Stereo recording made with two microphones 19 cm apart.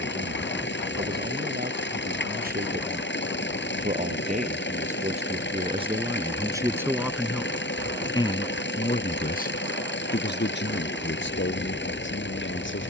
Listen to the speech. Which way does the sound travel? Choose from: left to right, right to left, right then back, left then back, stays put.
right to left.